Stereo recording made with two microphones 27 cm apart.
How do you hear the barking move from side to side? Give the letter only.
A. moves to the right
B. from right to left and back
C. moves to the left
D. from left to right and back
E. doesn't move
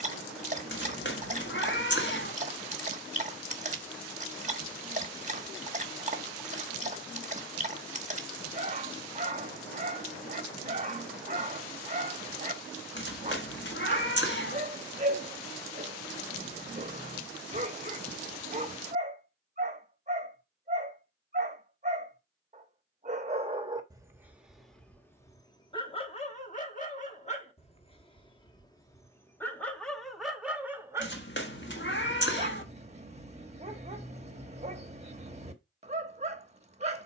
B.